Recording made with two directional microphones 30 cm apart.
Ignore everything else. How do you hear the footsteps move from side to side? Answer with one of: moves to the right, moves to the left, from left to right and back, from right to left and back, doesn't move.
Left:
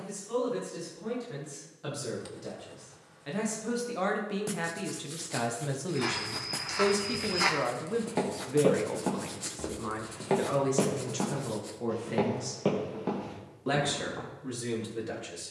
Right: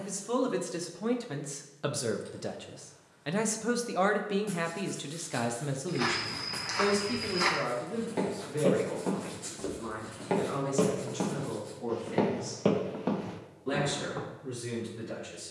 from right to left and back.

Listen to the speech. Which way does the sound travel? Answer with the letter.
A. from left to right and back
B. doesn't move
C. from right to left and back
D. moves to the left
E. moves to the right
D.